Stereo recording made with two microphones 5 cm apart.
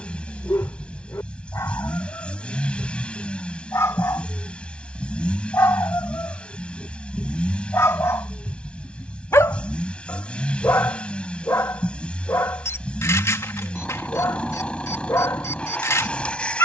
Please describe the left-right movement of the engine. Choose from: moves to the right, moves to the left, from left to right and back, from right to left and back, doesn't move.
doesn't move.